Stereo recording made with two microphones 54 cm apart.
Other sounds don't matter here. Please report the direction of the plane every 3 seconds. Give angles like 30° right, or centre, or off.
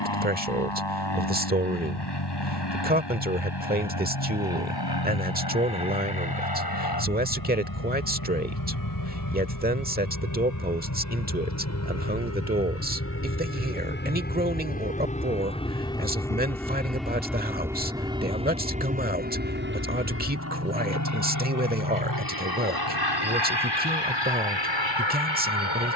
50° left, 50° left, 40° left, 30° left, 20° left, centre, 20° right, 40° right, 50° right.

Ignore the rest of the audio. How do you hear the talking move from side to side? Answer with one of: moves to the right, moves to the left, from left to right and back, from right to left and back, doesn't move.
doesn't move.